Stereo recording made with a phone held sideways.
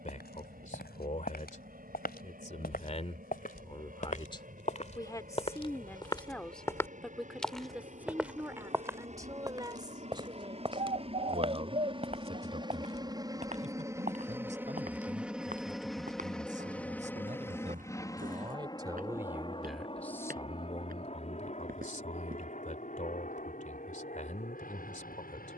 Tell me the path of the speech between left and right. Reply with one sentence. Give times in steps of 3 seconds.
You can hear the speech on the left from 0 s, in the centre from 6 s, on the right from 9 s, in the centre from 18 s and on the left from 21 s.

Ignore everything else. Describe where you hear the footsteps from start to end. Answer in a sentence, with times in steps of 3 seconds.
You can hear the footsteps on the left from 0 s, in the centre from 6 s, on the right from 9 s and not at all from 24 s.